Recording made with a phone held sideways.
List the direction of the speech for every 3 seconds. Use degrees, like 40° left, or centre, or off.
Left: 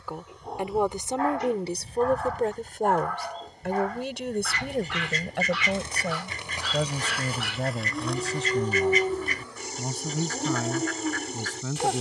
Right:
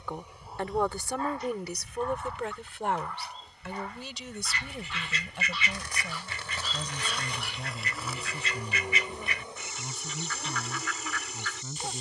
30° left, 60° left, 80° left, 80° left.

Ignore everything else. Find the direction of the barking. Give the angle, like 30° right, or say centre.
80° left.